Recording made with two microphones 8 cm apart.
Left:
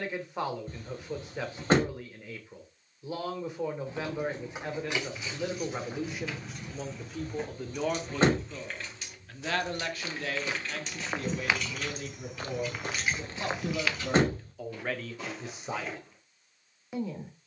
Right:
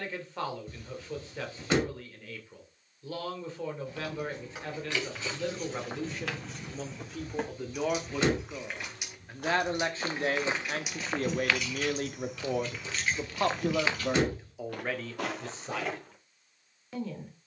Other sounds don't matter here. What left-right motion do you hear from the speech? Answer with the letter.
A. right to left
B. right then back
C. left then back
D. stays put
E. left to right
B.